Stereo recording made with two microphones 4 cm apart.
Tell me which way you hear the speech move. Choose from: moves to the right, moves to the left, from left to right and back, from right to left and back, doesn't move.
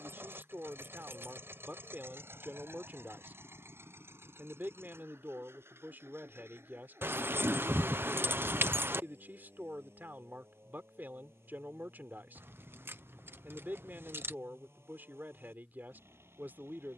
doesn't move.